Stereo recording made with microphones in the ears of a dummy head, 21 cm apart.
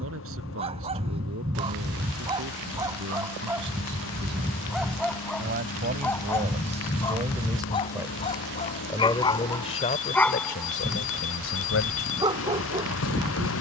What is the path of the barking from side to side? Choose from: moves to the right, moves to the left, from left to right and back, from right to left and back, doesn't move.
from right to left and back.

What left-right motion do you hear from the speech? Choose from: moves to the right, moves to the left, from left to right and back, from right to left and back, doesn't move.
moves to the left.